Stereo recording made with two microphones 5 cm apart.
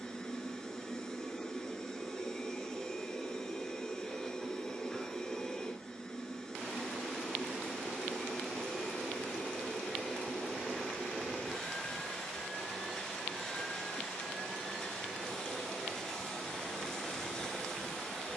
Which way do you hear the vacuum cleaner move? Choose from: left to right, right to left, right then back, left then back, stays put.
stays put.